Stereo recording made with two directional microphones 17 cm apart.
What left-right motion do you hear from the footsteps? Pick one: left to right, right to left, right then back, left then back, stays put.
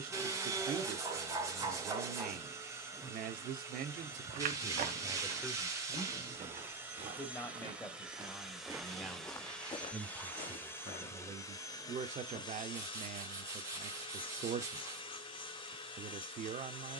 right to left.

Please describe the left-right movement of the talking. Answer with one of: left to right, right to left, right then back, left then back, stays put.
left then back.